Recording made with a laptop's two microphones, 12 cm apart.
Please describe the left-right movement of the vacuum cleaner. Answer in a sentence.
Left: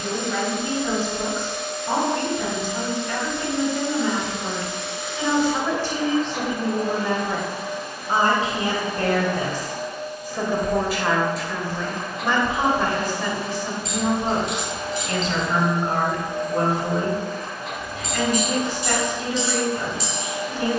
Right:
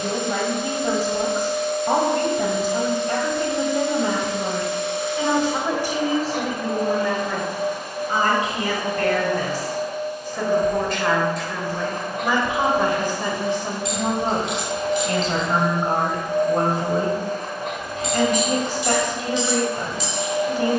You can hear the vacuum cleaner stay put.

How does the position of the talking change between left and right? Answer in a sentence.
In this clip you hear the talking move from right to left and back again.